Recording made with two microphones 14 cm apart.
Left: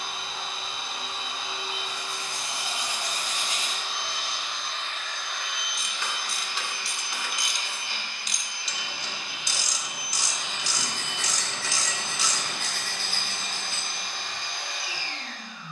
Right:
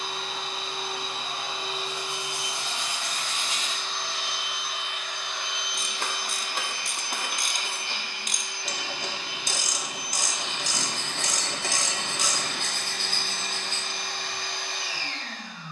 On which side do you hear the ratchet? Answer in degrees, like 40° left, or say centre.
50° right.